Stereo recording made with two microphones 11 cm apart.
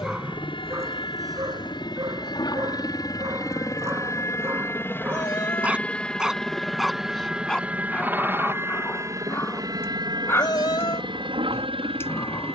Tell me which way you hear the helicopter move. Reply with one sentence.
In this clip you hear the helicopter move to the right.